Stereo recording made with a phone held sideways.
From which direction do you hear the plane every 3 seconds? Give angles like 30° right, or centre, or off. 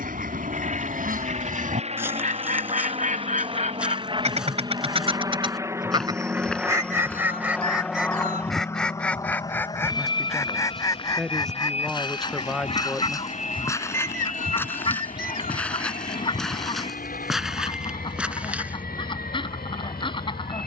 50° right, 30° right, centre, 30° left, 50° left, 60° left, 70° left.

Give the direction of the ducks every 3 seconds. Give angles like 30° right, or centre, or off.
70° right, 50° right, 10° right, 20° left, 30° left, 30° left, 30° left.